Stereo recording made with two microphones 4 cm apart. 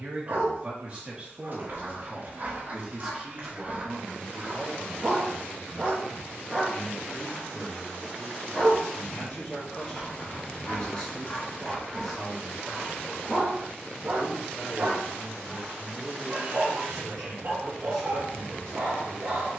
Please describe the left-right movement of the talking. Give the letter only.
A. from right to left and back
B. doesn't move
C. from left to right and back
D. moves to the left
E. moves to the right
D.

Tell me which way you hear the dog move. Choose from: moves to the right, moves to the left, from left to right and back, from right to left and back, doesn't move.
from right to left and back.